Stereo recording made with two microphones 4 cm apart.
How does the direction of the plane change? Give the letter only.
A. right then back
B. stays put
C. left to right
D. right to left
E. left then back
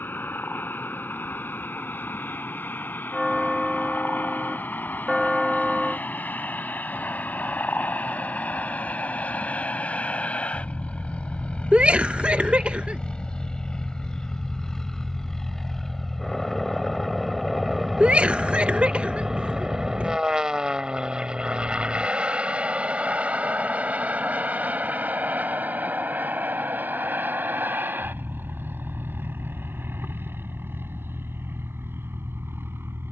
C.